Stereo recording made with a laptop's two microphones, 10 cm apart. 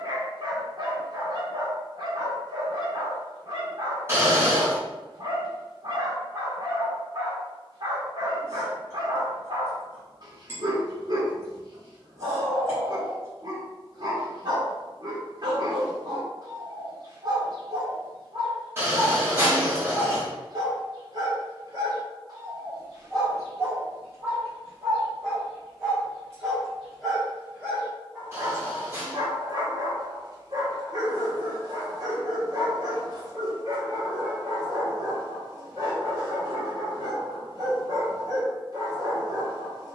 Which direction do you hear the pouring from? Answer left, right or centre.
right.